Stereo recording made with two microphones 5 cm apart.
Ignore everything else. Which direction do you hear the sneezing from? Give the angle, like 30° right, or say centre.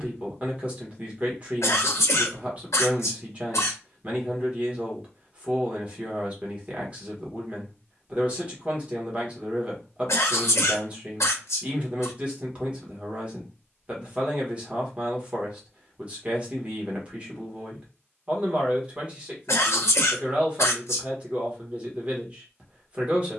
70° left.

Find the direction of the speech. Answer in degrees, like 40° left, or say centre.
20° right.